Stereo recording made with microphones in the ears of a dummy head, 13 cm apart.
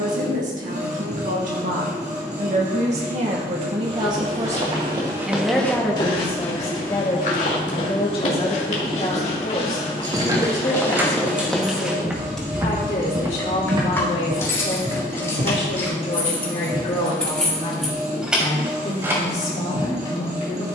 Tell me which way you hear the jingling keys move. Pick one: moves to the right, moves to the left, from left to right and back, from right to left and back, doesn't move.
from right to left and back.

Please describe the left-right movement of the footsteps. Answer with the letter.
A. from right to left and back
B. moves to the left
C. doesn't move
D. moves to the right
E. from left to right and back
A.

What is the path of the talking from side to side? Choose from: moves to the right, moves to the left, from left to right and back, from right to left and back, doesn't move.
moves to the left.